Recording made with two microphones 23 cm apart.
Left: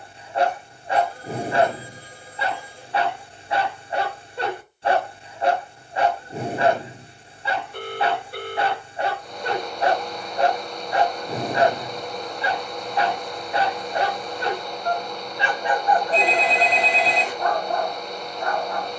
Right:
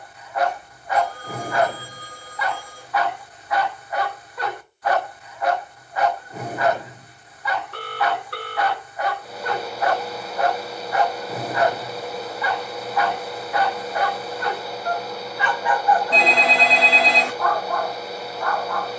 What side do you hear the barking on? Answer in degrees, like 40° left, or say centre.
30° left.